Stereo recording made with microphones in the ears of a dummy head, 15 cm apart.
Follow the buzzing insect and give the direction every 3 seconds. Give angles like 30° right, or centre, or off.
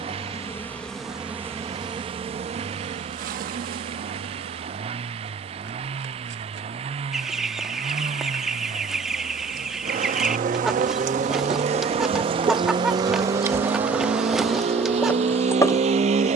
10° right, 60° right, 70° right, 50° right, 10° right, 20° left.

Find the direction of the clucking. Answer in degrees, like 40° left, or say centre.
centre.